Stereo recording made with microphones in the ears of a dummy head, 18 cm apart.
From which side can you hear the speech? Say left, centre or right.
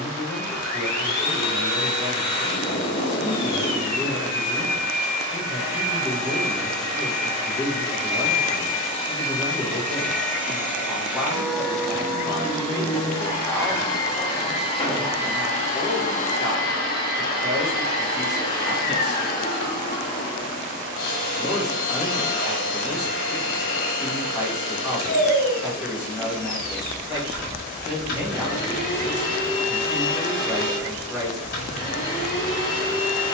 centre.